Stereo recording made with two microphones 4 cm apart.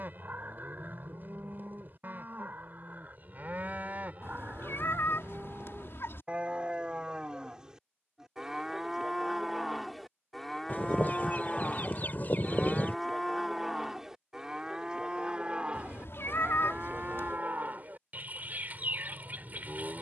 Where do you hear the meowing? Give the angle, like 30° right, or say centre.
60° left.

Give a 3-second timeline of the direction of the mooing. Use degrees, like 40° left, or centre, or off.
40° right, 30° right, 20° right, centre, 10° right, 30° right, 40° right.